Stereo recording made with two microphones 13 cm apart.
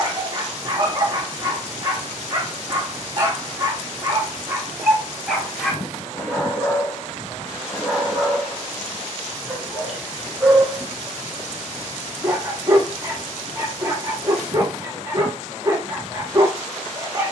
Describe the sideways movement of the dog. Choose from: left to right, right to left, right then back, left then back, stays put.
left then back.